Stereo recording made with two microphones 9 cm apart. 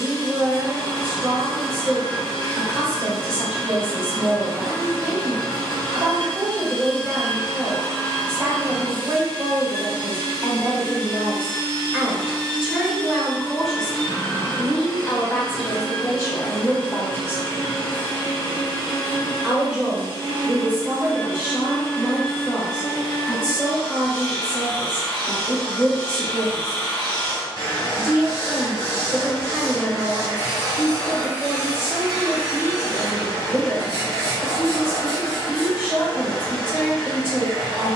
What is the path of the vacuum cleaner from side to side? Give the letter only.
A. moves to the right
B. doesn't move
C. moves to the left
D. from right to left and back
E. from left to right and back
B.